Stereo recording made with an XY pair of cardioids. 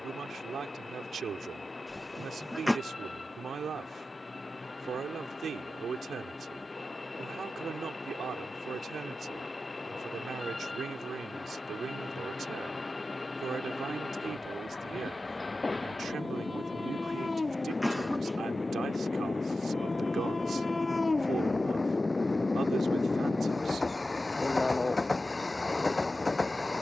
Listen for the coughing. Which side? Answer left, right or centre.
centre.